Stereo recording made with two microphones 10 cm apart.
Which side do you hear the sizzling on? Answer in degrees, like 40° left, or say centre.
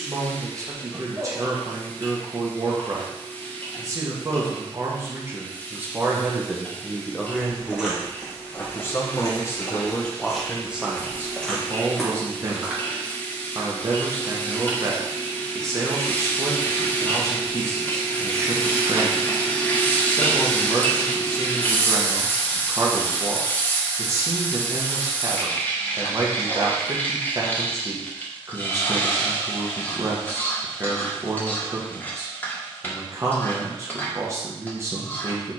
20° left.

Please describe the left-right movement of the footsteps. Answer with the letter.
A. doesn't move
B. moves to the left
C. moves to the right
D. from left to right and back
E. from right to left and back
E.